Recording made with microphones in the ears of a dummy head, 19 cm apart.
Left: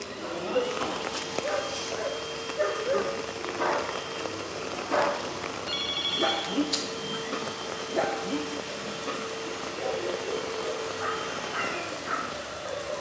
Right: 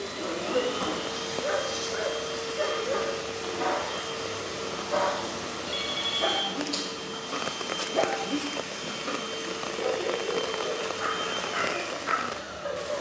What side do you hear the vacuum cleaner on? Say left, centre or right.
right.